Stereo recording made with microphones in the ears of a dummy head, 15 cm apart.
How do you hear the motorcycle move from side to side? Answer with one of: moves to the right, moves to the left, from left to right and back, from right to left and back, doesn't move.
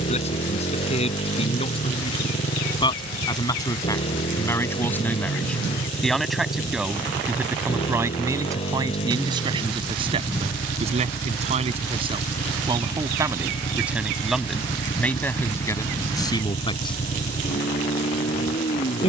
doesn't move.